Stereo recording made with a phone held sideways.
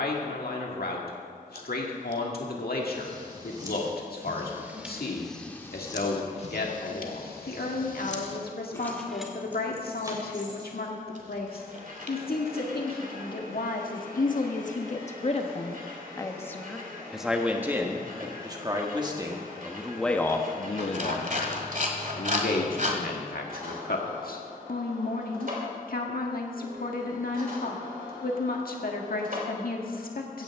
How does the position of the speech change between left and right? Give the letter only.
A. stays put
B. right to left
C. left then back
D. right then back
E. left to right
D.